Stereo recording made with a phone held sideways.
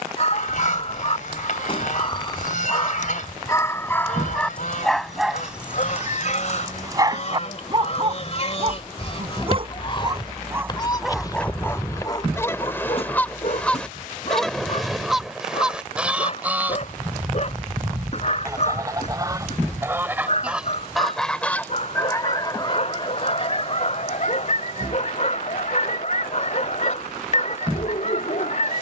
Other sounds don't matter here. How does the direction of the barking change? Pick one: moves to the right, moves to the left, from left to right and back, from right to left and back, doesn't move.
from left to right and back.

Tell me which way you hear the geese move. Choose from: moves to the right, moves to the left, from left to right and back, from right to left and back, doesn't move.
from left to right and back.